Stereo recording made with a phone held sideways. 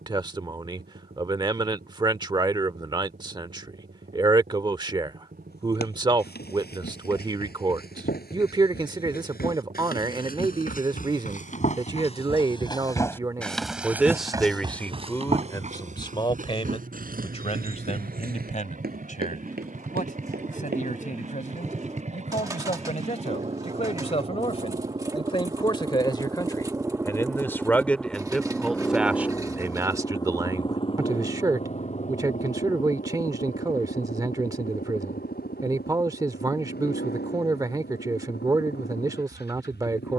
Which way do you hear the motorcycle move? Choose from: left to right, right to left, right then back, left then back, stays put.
right to left.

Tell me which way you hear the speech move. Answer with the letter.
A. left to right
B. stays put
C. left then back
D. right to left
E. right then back
C.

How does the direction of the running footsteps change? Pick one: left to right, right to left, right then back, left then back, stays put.
left to right.